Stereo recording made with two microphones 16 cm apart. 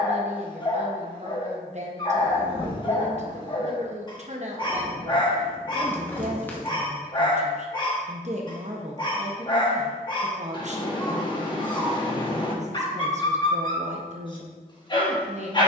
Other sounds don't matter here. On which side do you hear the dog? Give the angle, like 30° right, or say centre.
30° left.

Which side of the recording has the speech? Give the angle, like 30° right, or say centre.
50° right.